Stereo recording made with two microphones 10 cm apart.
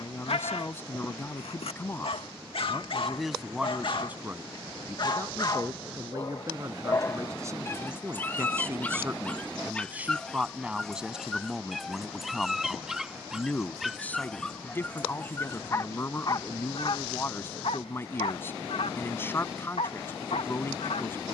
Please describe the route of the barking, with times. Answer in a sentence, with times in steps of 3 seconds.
In this clip you hear the barking on the left from 0 s, in the centre from 9 s and on the left from 15 s.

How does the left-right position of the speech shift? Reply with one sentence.
You can hear the speech move from left to right and back again.